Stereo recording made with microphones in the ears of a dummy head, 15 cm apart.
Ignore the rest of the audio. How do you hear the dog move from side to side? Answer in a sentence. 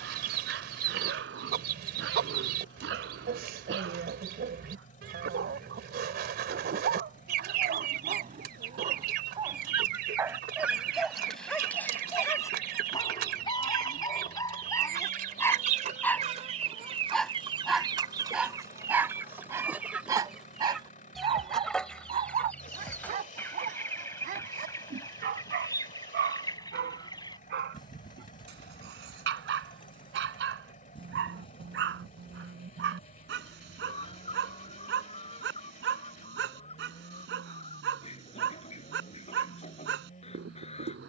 You can hear the dog move from right to left and back again.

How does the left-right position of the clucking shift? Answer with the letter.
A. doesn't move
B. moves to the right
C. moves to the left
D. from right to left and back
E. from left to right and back
C.